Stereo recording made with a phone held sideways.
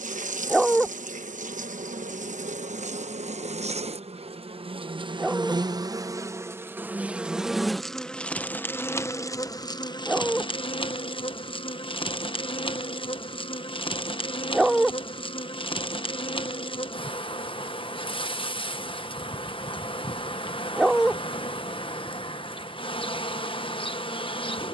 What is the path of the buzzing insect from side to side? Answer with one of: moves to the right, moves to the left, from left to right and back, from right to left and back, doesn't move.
moves to the left.